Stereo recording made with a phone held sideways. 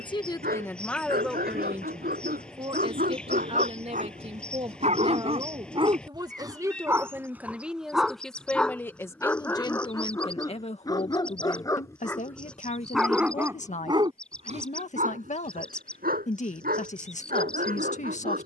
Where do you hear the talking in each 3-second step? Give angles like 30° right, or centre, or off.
centre, 40° right, 10° right, 40° left, 50° left, 50° left.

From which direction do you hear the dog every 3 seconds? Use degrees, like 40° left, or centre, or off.
70° right, 50° right, 10° right, 20° left, 10° right, 70° right.